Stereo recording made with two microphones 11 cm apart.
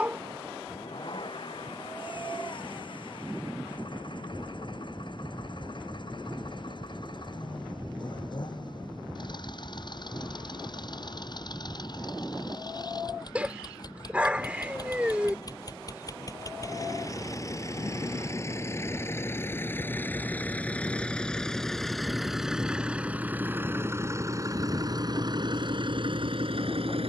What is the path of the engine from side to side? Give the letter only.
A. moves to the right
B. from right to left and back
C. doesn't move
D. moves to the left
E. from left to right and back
A.